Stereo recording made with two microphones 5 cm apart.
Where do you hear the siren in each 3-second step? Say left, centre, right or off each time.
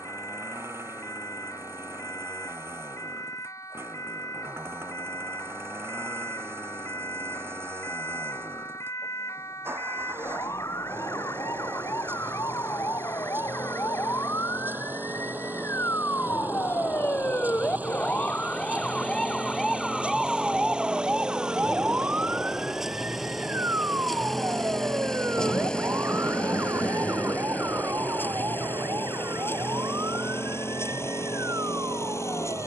left, left, left, left, left, left, centre, right, right, right, right.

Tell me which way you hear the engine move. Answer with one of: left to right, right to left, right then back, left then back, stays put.
right to left.